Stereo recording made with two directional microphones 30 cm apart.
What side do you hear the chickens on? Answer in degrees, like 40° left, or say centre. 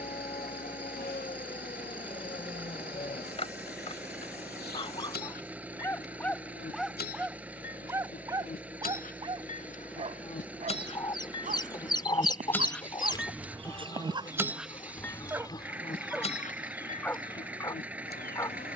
10° left.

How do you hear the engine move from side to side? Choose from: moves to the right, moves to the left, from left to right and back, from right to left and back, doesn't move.
doesn't move.